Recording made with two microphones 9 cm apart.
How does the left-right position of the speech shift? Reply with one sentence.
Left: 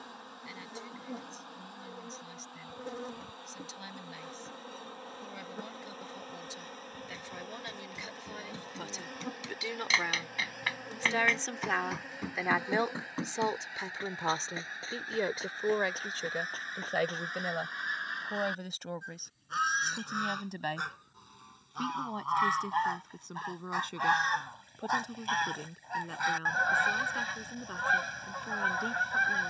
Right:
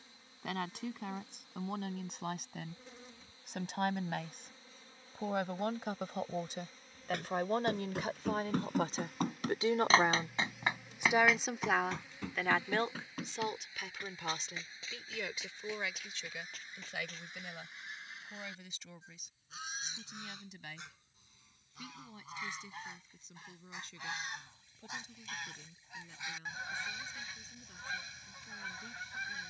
You can hear the speech travel towards the left.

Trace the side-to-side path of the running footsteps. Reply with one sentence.
In this clip you hear the running footsteps go from the right side to the left.